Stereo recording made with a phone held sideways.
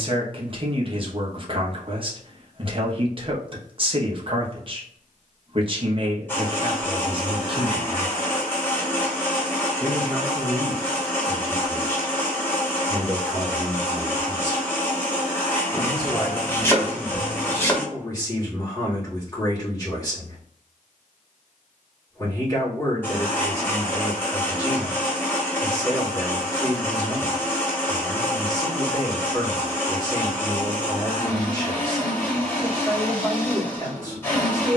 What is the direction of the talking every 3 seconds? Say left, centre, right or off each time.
right, right, right, centre, left, left, left, left, left, left, left, left.